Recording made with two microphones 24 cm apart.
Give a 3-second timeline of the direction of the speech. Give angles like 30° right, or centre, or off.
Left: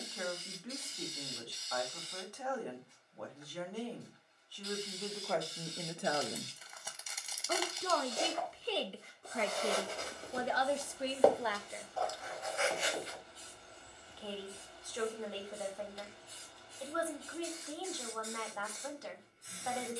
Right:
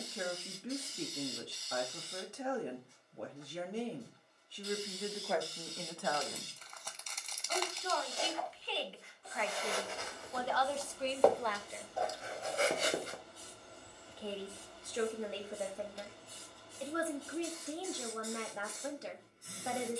20° right, 10° right, 50° left, 20° left, 20° right, 20° right, 20° right.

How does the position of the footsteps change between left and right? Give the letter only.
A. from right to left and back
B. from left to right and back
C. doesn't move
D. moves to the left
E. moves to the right
E.